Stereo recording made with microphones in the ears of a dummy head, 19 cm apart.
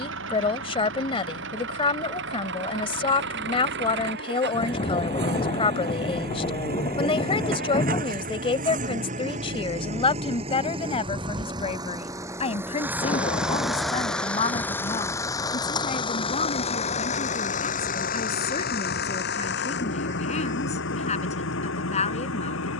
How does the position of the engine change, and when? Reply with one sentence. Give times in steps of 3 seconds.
You can hear the engine on the right from 0 s, in the centre from 12 s and on the left from 15 s.